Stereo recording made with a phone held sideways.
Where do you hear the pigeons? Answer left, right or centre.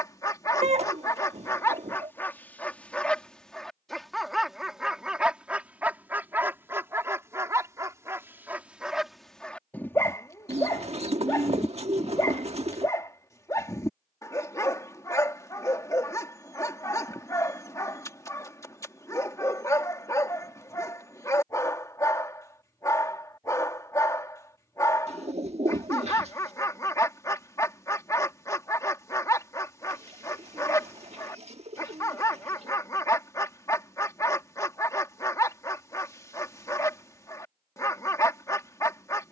right.